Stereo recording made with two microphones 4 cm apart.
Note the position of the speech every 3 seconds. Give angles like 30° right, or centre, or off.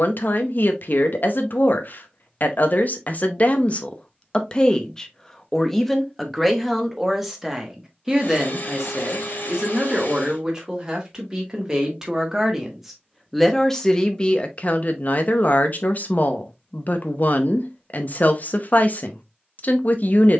60° left, 20° left, 10° right, 20° right, 10° left, 50° left, 50° left.